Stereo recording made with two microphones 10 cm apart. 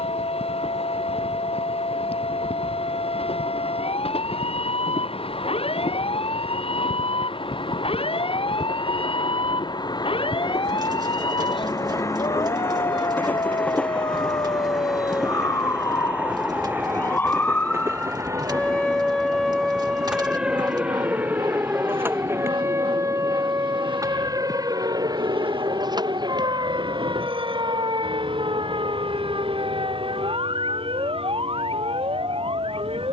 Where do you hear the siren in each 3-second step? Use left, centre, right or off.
left, left, left, left, left, left, centre, right, right, right, right.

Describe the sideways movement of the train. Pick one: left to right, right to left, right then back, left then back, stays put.
left to right.